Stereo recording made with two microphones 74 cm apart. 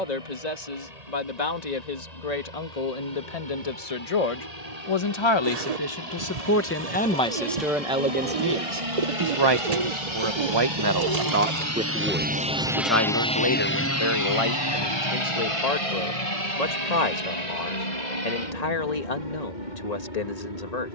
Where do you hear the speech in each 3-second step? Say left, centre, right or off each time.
left, left, centre, right, left, left, left.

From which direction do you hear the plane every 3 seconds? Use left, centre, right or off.
right, right, right, right, centre, left, left.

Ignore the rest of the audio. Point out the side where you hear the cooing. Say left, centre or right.
right.